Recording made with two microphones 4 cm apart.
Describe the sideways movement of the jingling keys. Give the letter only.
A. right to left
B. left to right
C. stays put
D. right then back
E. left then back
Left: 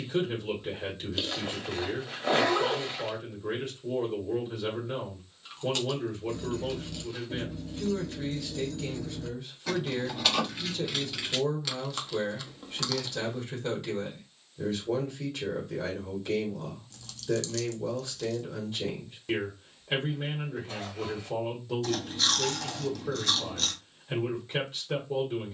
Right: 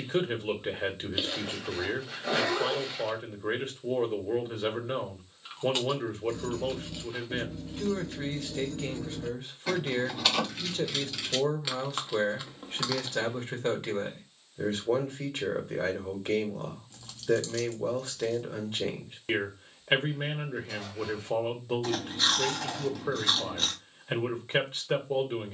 D.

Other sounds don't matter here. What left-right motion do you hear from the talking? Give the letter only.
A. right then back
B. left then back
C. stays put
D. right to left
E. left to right
C.